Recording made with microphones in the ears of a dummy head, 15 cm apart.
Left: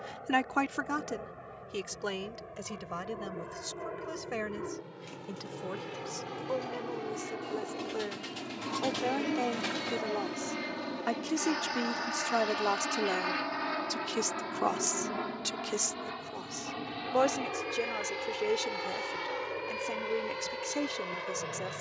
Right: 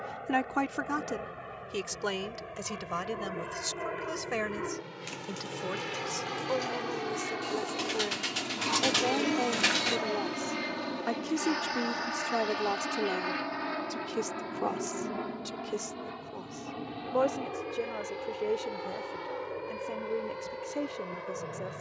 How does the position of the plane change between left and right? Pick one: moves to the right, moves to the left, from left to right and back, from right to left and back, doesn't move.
moves to the left.